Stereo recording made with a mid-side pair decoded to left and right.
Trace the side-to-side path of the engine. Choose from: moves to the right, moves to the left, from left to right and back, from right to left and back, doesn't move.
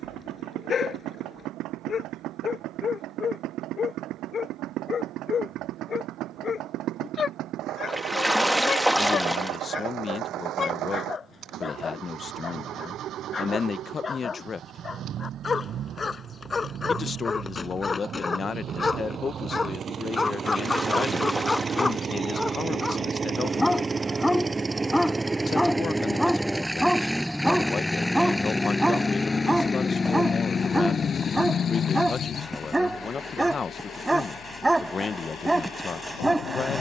moves to the left.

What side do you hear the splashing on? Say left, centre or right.
centre.